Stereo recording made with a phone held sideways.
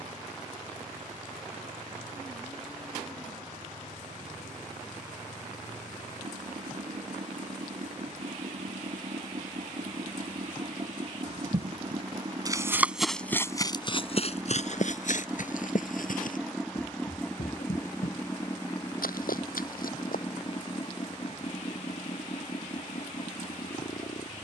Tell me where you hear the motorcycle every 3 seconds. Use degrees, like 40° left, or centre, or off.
70° right, 60° right, 60° right, 40° right, 20° right, centre, 30° left, 50° left.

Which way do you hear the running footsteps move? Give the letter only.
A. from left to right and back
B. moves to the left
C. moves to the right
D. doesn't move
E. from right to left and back
B.